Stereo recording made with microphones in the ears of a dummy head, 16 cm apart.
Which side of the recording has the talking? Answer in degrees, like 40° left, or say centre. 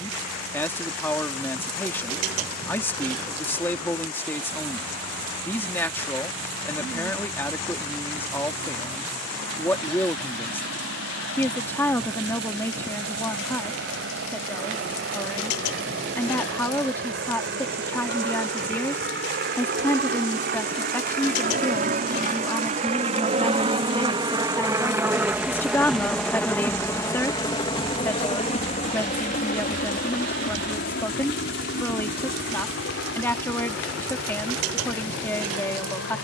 10° left.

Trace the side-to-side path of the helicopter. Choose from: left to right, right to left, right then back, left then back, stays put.
right to left.